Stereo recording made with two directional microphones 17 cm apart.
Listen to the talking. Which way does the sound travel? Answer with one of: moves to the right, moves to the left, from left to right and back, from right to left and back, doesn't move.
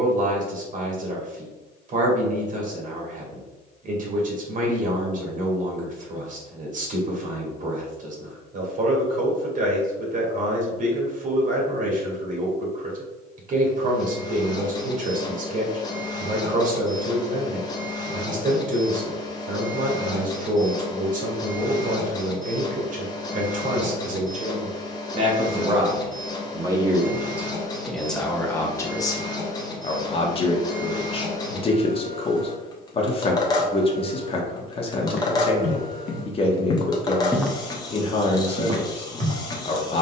moves to the left.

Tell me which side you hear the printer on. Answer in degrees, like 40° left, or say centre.
20° left.